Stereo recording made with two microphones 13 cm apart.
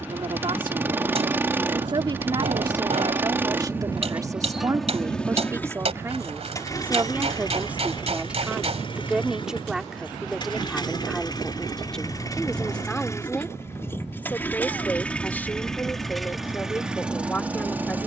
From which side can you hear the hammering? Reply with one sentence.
You can hear the hammering on the right.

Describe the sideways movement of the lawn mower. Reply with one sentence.
In this clip you hear the lawn mower go left and come back.